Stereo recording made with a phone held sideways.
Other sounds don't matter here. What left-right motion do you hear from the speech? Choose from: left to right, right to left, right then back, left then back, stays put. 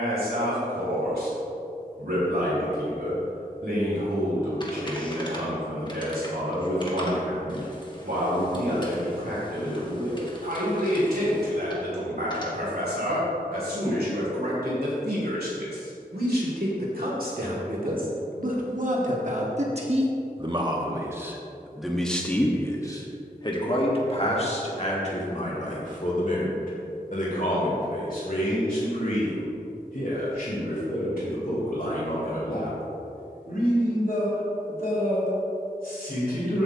right to left.